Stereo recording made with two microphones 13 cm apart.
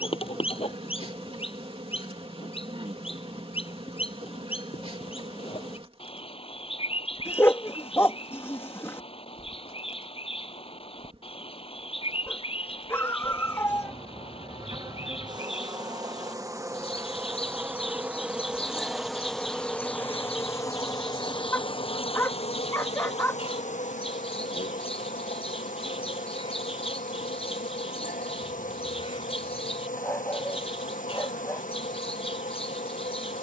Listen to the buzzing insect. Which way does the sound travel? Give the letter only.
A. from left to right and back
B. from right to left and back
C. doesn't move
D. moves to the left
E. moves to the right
D.